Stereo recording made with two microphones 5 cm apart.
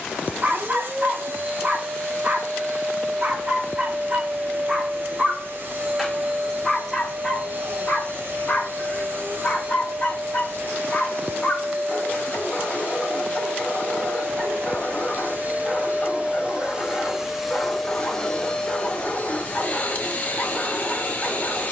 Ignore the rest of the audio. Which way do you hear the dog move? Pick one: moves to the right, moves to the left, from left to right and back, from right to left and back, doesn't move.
moves to the left.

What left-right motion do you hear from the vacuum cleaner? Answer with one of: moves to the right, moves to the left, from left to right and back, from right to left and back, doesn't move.
moves to the left.